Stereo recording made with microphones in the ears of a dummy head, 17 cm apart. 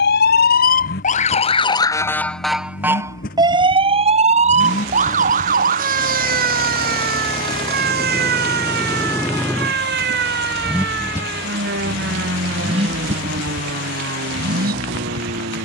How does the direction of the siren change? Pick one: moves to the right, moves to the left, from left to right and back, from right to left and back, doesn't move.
moves to the right.